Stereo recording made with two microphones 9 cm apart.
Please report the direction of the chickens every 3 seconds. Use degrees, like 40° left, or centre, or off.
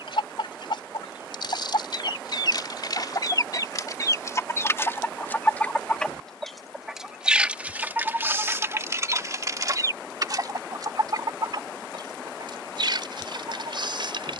60° left, 30° left, 20° right, 40° right, 60° right.